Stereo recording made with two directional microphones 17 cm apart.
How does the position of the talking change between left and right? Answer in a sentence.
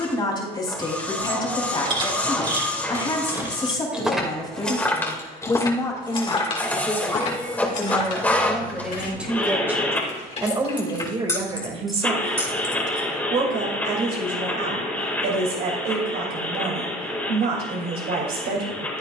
In this clip you hear the talking go from the left side to the right.